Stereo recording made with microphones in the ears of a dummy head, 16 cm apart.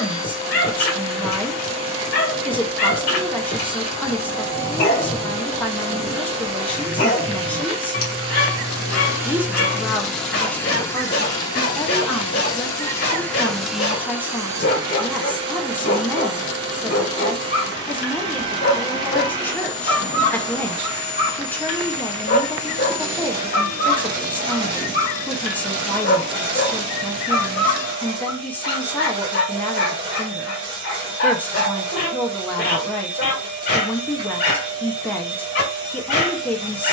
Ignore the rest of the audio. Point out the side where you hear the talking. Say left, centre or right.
centre.